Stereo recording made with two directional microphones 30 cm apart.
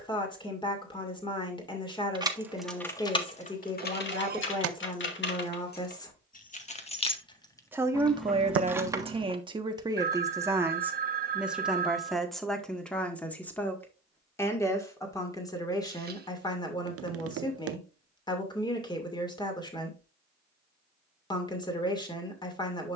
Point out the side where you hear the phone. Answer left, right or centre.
right.